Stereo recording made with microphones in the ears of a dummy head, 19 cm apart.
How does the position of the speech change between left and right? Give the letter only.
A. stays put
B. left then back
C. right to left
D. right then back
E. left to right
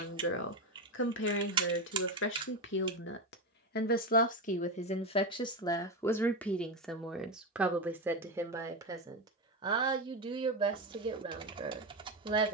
E.